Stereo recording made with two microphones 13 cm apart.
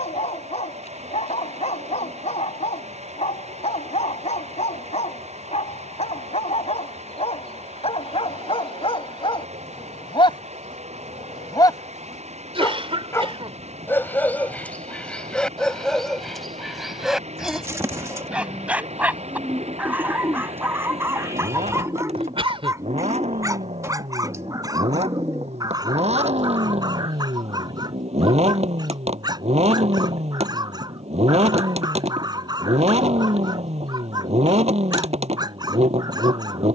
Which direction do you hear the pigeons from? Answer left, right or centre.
right.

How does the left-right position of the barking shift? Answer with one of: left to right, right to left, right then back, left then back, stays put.
left to right.